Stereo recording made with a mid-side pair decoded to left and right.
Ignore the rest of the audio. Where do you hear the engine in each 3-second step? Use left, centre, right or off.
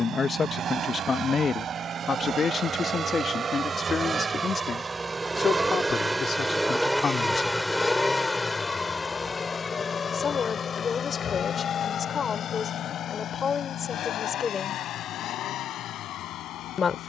right, right, centre, left, left, left.